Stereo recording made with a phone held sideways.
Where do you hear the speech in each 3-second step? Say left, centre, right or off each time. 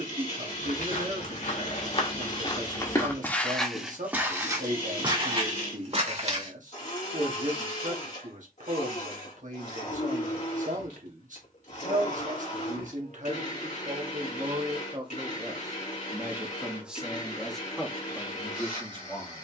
right, right, right, right, right, centre, centre.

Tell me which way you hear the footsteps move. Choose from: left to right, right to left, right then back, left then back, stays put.
left to right.